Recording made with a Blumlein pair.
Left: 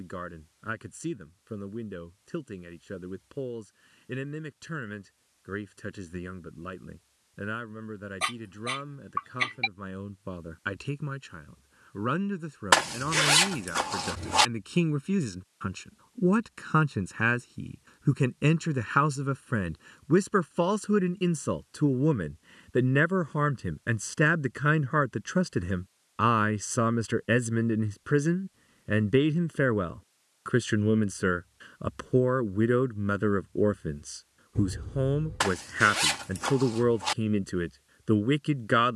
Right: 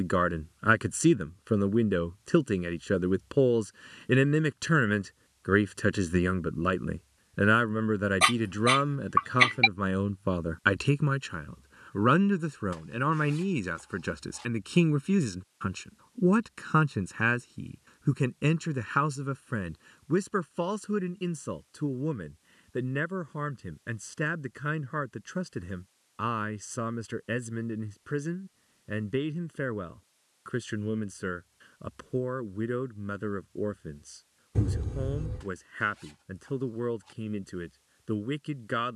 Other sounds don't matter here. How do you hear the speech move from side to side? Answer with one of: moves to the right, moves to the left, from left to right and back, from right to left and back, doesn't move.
moves to the left.